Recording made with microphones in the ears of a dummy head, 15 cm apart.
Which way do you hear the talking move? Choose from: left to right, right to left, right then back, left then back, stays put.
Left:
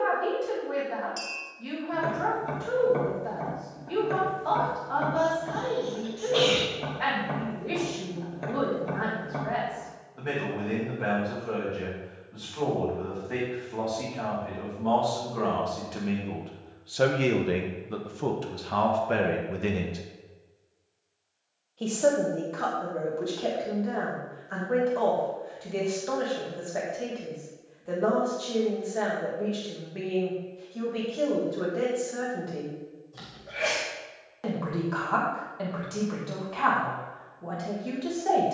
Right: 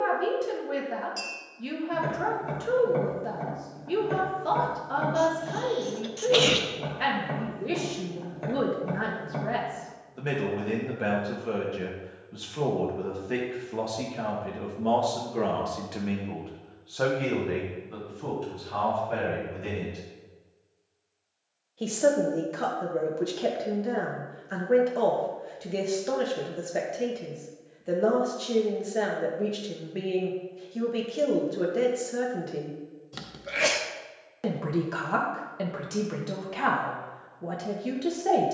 left then back.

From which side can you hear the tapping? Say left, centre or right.
centre.